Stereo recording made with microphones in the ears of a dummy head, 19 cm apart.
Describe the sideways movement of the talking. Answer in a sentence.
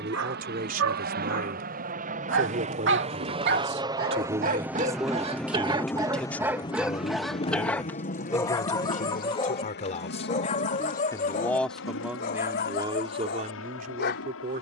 In this clip you hear the talking go left and come back.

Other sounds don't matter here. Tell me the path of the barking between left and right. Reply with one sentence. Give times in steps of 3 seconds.
In this clip you hear the barking on the right from 0 s, in the centre from 6 s and on the left from 9 s.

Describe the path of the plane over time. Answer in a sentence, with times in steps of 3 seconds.
You can hear the plane on the right from 0 s, in the centre from 3 s and on the left from 6 s.